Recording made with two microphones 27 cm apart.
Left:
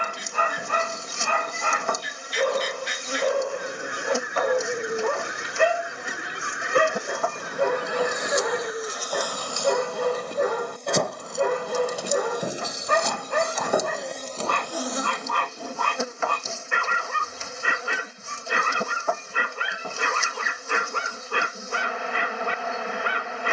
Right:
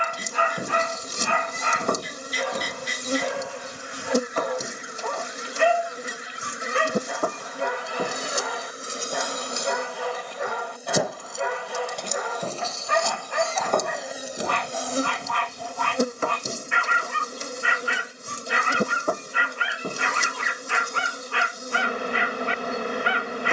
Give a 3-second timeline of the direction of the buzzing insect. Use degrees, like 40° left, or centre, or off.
40° right, 40° right, 40° right, 10° right, centre, 40° right, 40° right, 40° right.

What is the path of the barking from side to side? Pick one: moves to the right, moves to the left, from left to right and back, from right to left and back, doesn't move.
doesn't move.